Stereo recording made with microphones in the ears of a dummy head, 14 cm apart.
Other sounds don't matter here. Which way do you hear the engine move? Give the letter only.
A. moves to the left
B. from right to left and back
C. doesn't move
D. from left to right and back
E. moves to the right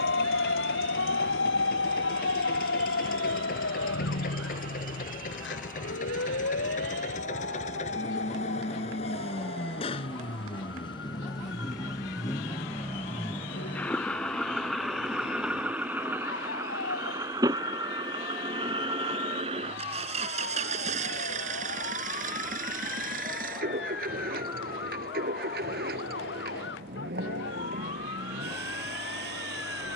E.